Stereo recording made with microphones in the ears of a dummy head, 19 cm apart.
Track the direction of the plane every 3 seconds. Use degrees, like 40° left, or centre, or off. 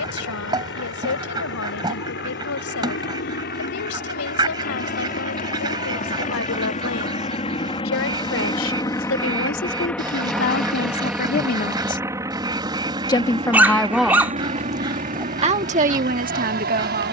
60° left, 50° left, 30° left, centre, 20° right, 40° right.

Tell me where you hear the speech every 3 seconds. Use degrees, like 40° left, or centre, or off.
70° left, 70° left, 70° left, 50° left, centre, 40° right.